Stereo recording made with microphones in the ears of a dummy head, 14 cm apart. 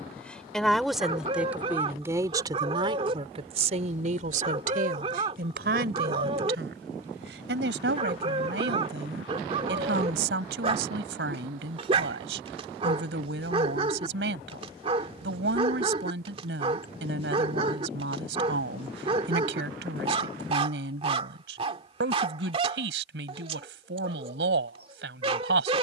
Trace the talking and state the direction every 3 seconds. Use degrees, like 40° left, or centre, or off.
10° right, 50° right, 80° right, 80° right, 80° right, 80° right, 80° right, 80° right, 80° right.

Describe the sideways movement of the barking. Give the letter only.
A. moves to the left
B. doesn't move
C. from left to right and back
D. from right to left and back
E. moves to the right
B.